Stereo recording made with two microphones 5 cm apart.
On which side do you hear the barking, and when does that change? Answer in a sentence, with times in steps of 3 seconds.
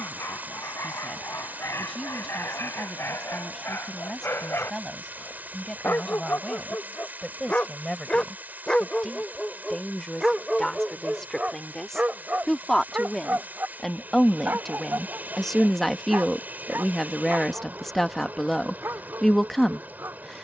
In this clip you hear the barking on the left from 0 s, in the centre from 9 s and on the right from 12 s.